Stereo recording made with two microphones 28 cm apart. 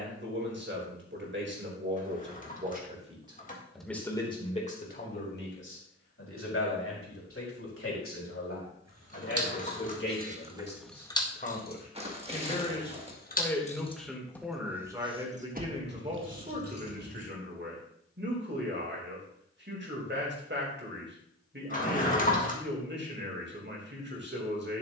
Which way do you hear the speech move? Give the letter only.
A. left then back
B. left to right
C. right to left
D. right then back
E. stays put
A.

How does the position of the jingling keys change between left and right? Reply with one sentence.
In this clip you hear the jingling keys move from right to left and back again.